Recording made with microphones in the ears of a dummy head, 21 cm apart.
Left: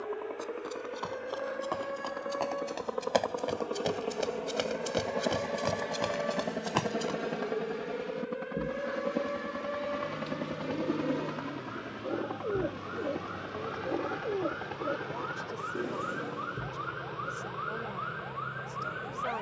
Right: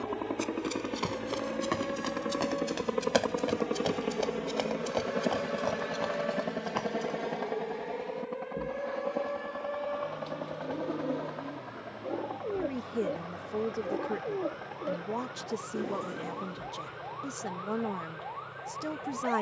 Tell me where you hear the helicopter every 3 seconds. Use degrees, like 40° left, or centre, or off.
50° right, 20° right, 10° left, 30° left, 50° left, 50° left, 60° left.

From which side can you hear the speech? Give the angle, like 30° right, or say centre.
70° right.